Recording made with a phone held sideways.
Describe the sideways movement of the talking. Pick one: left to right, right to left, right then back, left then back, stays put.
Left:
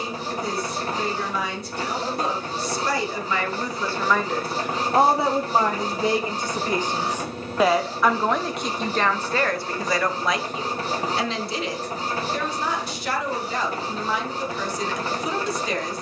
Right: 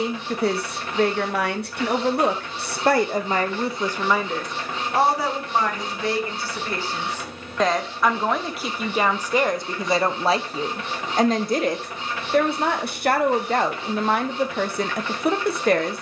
left then back.